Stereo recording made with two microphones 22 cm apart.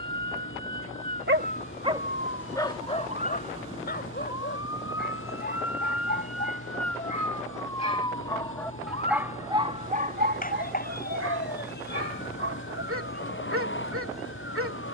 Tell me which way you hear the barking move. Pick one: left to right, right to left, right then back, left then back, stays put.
left then back.